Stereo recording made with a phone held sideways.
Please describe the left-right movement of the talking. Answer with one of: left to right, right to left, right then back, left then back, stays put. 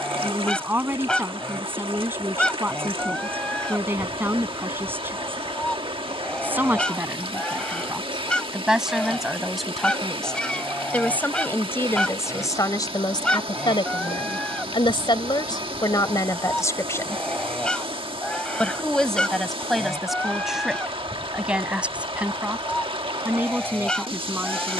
left then back.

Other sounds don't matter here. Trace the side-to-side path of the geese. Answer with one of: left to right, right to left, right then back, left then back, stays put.
stays put.